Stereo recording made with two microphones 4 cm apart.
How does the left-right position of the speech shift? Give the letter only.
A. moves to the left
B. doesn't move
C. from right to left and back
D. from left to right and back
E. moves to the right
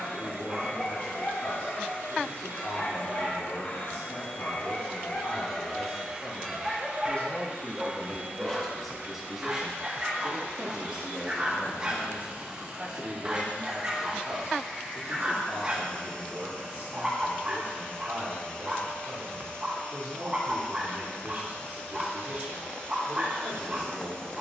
E.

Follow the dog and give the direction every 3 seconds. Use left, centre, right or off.
left, left, centre, right, right, right, right, right.